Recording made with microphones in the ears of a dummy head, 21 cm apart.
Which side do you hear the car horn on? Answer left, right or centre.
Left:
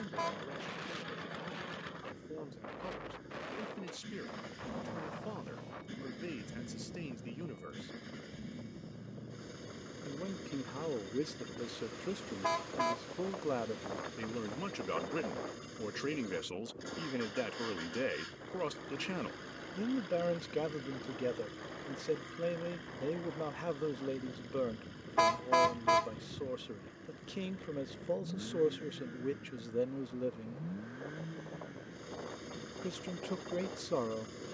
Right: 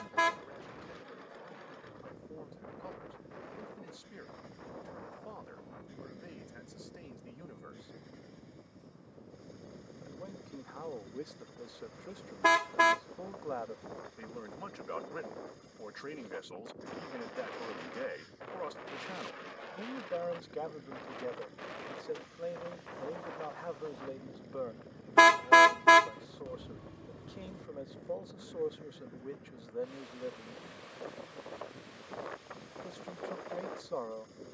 right.